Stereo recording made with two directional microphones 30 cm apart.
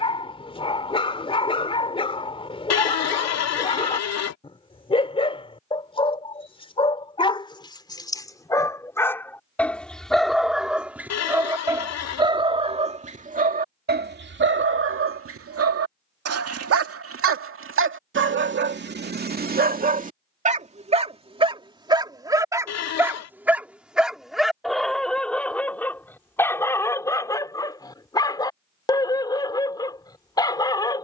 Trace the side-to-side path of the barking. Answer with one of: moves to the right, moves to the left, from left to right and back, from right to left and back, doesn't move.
from left to right and back.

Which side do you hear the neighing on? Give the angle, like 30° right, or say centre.
60° left.